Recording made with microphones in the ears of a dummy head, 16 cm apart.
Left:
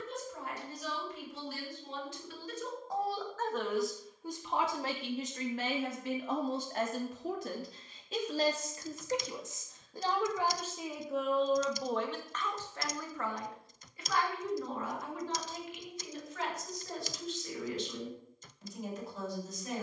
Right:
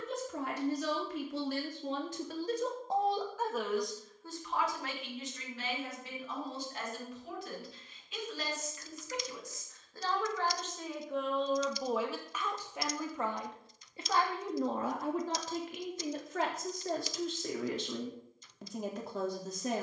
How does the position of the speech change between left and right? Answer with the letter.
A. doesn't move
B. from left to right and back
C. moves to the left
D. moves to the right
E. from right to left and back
E.